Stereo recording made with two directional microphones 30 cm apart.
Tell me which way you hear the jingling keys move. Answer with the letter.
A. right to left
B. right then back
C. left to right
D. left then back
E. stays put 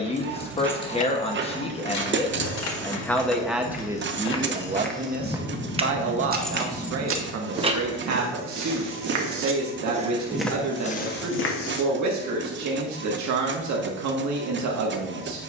D.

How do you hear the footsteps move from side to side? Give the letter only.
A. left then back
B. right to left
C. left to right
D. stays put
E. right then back
E.